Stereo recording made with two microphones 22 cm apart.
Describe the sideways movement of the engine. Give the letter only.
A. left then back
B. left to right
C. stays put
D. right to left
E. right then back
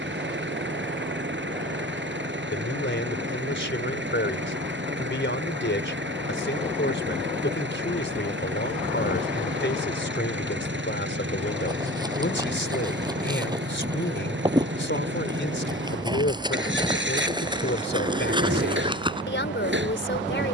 C.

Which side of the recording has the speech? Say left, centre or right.
left.